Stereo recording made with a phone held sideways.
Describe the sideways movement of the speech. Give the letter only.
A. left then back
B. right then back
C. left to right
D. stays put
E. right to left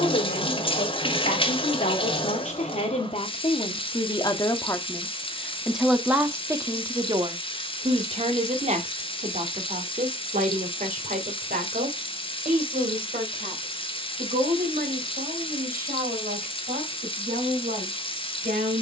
C.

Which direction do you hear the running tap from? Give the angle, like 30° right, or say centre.
40° left.